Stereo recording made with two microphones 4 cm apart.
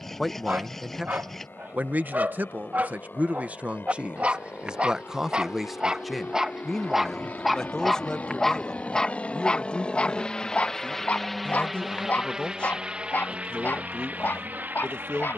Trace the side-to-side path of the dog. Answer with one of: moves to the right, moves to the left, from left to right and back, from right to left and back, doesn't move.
moves to the left.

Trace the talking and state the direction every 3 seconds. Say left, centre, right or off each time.
right, right, centre, left, left.